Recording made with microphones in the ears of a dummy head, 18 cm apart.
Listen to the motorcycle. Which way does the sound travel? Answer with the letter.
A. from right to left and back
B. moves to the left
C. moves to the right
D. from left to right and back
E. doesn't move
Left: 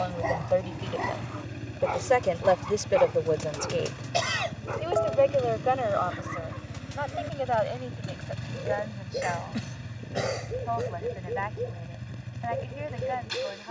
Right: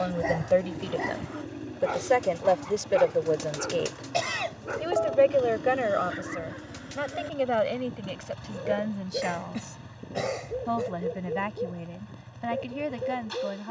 E.